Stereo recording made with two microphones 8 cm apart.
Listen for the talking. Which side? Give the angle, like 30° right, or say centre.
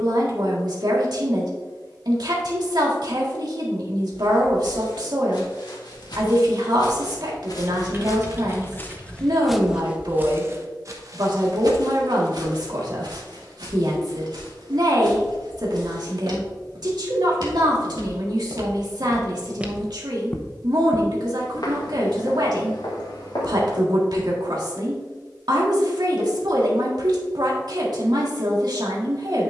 60° right.